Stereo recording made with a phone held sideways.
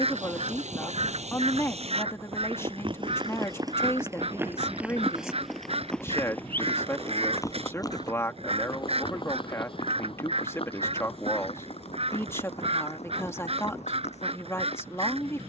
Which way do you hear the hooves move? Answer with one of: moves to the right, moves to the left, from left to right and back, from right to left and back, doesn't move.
moves to the left.